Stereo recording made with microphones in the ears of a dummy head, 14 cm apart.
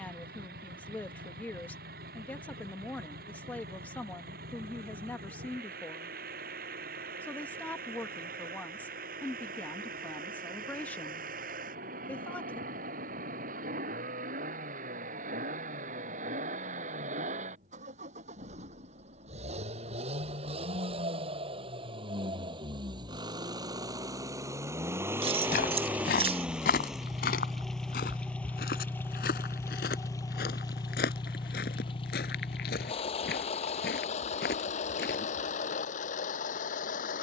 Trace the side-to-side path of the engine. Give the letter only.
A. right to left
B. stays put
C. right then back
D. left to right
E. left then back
A.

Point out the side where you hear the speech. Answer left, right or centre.
centre.